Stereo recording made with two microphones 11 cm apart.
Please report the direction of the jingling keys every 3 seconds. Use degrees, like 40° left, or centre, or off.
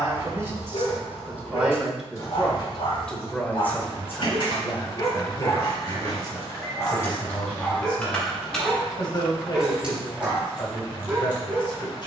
10° left, 50° left, 20° left, 20° right.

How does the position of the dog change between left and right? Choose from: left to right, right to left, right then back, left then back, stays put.
left to right.